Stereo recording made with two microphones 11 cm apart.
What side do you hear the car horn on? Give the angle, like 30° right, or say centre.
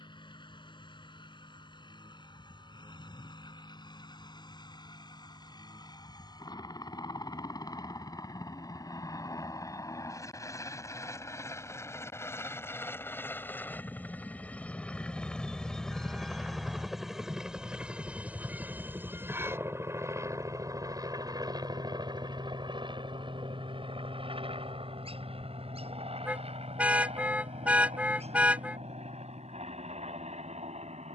10° right.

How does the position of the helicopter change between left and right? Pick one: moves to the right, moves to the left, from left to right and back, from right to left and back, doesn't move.
moves to the right.